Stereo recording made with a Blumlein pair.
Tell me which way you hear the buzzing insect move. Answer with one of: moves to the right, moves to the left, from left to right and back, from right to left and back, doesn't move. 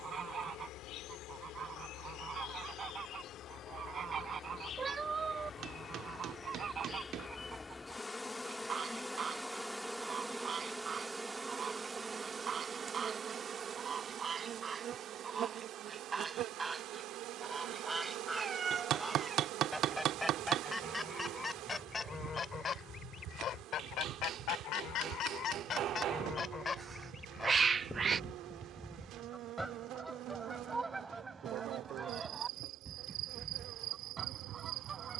moves to the right.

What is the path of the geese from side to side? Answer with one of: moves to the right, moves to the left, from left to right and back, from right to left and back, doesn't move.
from right to left and back.